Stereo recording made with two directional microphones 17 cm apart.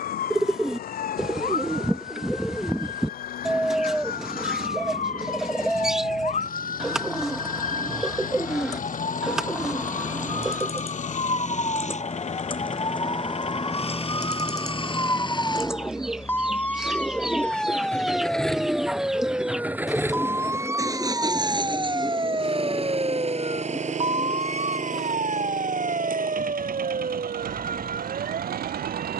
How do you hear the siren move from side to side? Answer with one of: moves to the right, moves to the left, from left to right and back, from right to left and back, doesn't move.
moves to the right.